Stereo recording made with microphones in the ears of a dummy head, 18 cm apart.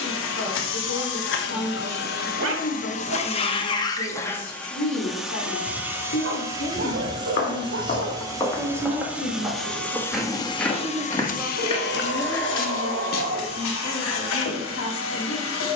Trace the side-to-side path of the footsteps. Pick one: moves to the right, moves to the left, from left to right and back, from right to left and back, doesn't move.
from left to right and back.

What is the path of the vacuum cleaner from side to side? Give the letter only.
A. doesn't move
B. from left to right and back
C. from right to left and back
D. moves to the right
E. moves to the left
B.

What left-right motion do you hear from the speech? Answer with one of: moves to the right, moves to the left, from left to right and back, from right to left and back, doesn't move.
from left to right and back.